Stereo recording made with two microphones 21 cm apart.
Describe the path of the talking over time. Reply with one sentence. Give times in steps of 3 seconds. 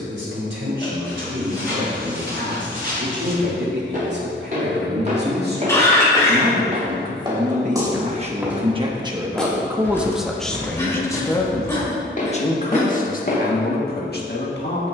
You can hear the talking on the right from 0 s, in the centre from 9 s and on the left from 12 s.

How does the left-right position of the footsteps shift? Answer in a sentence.
In this clip you hear the footsteps move to the left.